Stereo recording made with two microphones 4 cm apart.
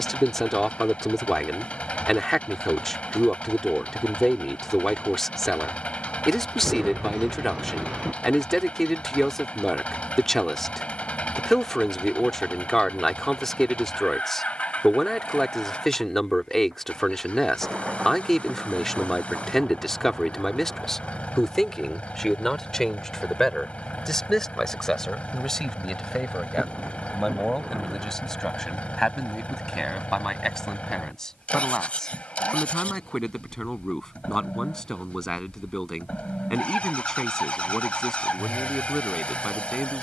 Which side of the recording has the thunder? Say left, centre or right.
right.